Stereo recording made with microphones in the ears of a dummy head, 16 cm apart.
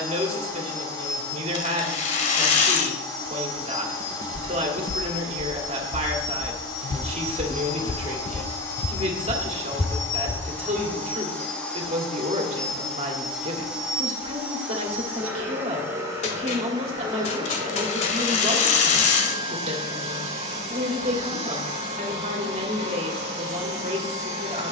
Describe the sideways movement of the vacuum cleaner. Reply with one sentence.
In this clip you hear the vacuum cleaner go from the left side to the right.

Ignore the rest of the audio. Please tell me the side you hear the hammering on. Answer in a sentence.
In this clip you hear the hammering on the left.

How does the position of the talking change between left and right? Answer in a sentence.
In this clip you hear the talking stay put.